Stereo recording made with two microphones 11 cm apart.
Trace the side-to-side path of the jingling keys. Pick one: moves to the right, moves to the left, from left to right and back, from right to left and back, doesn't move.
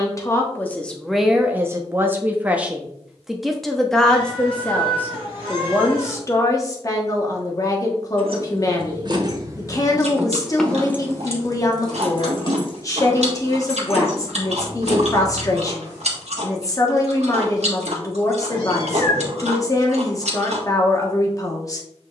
moves to the left.